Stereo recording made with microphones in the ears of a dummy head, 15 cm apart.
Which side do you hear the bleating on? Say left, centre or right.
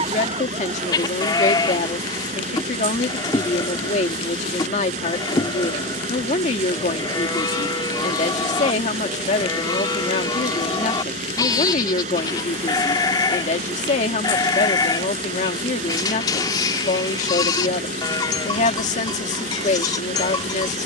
left.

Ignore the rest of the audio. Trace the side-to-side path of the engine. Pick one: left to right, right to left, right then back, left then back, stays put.
stays put.